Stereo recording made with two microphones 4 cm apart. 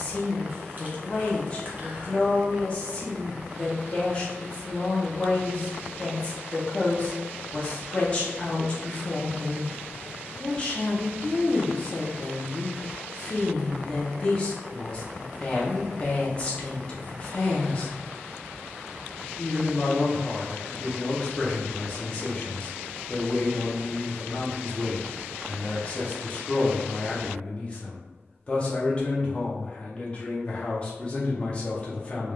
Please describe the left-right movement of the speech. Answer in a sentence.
You can hear the speech stay in one place.